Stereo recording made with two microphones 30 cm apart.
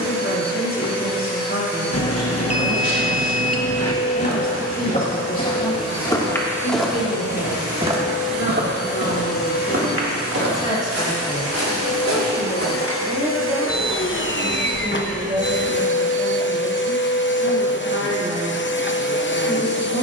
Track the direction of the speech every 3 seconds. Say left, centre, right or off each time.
left, left, left, left, centre, right, right.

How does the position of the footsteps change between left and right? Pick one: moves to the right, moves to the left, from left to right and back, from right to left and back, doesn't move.
moves to the right.